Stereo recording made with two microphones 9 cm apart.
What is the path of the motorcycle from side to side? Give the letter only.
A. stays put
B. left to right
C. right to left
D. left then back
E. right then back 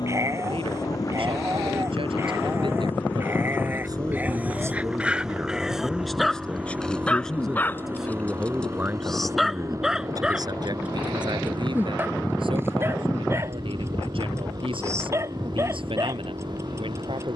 B.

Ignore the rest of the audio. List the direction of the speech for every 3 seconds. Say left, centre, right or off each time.
right, right, centre, right, right, right.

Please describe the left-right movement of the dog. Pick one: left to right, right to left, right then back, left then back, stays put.
left then back.